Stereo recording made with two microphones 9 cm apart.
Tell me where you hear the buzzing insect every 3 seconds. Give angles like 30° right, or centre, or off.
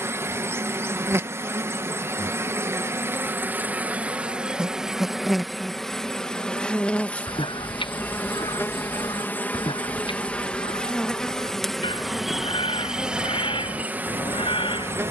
30° right, 10° right, 20° left, 10° left, 10° right.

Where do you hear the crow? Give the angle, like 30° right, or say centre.
70° left.